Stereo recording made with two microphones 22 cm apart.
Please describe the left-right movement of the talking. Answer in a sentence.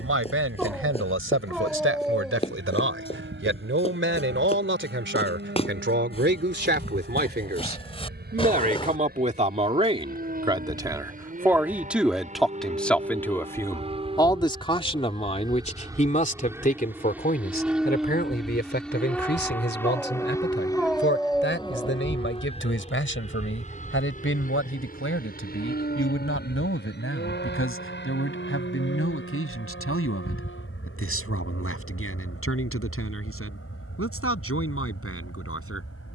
In this clip you hear the talking travel towards the left.